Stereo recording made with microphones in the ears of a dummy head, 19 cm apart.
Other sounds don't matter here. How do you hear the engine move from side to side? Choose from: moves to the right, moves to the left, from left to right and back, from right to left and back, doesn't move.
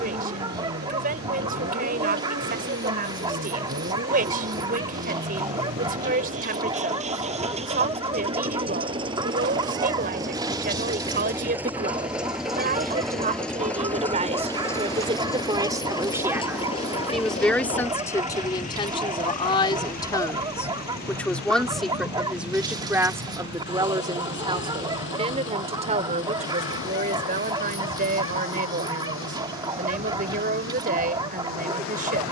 moves to the left.